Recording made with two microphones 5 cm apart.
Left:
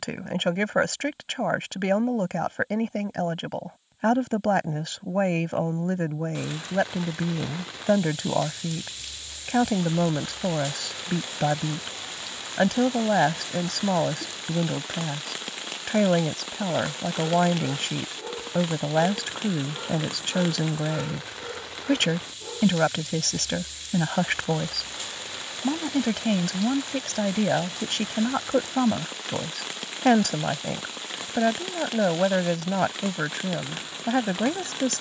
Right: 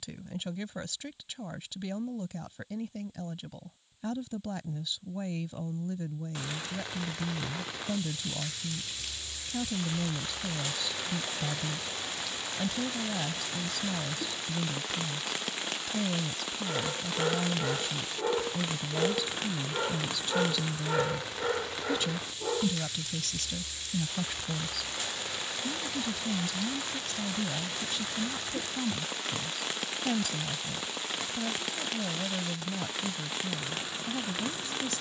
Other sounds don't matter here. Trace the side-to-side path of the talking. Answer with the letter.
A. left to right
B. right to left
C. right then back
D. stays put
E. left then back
D.